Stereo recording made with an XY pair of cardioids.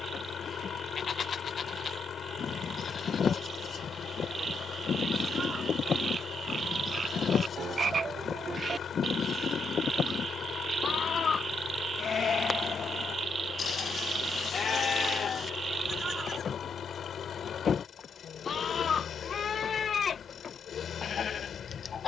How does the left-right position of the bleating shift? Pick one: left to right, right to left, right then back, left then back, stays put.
stays put.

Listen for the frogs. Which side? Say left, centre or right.
right.